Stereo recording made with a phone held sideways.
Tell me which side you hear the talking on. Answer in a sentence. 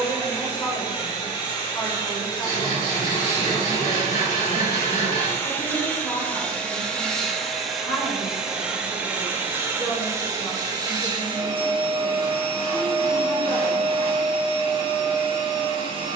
You can hear the talking on the left.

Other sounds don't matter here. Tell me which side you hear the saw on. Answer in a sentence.
In this clip you hear the saw on the left.